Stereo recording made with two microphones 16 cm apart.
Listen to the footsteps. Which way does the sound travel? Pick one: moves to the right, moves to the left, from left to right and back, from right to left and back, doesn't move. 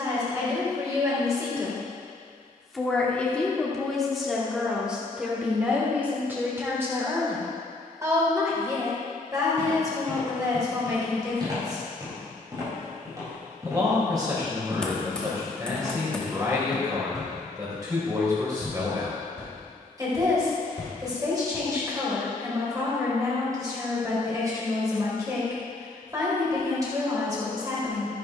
moves to the left.